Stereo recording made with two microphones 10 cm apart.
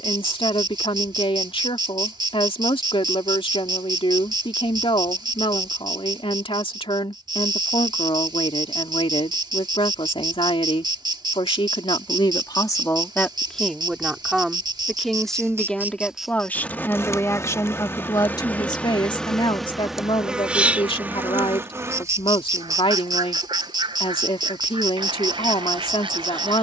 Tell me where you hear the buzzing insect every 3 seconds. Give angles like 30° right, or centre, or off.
50° right, 50° right, 50° right, 50° right, 50° right, centre, centre, 30° right, 50° right.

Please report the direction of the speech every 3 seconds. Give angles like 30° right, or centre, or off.
70° left, 70° left, 70° left, 70° left, 20° left, 20° left, 60° left, 70° left, 70° left.